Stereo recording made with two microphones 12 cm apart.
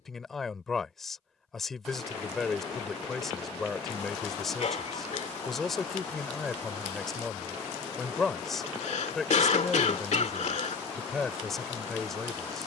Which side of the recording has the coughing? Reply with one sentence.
You can hear the coughing on the left.